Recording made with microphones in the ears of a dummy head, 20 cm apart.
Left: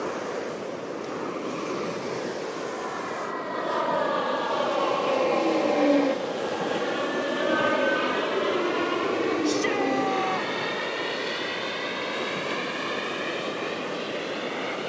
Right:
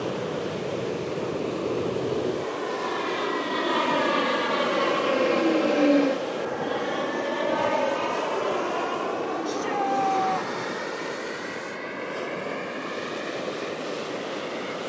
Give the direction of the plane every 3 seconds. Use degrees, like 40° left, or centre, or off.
60° right, 30° right, 10° left, 40° left, 50° left.